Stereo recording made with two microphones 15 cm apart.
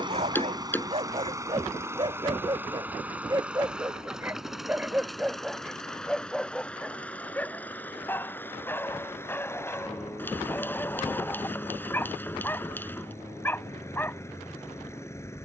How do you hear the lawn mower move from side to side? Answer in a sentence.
In this clip you hear the lawn mower move to the left.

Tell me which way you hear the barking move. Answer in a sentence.
In this clip you hear the barking move from right to left.